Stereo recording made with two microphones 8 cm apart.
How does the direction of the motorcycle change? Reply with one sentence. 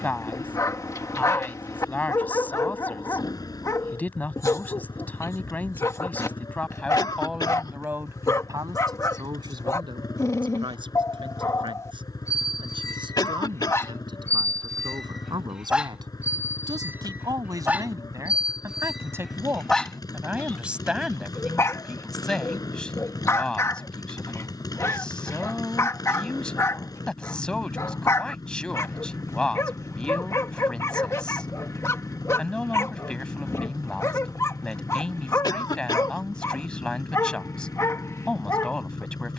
You can hear the motorcycle stay put.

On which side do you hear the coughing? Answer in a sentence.
You can hear the coughing on the left.